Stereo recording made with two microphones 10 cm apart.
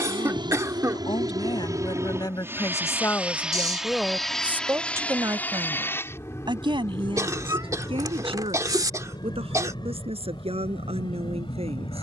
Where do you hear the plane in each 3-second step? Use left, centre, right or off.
right, centre, left, left.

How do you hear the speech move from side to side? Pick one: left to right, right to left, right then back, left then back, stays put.
left to right.